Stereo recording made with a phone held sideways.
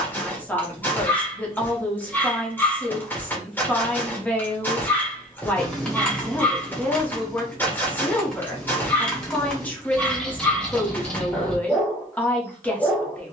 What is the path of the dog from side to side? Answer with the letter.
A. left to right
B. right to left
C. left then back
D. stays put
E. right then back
D.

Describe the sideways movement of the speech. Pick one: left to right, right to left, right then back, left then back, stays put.
stays put.